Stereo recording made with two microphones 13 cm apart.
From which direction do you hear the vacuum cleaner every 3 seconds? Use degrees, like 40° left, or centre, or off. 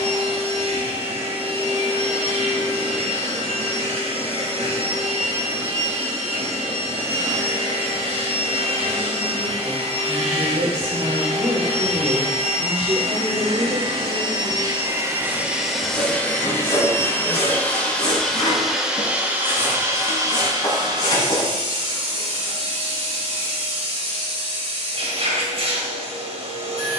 60° right, 60° right, 60° right, 60° right, 50° right, 10° left, 20° right, 50° right, 50° right.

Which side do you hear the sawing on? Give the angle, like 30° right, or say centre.
40° left.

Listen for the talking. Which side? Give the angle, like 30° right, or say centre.
70° right.